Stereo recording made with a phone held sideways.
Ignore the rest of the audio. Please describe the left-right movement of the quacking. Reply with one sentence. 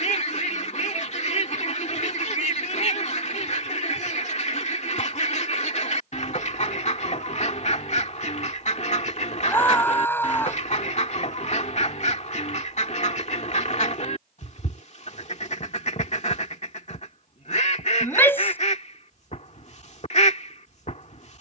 You can hear the quacking stay in one place.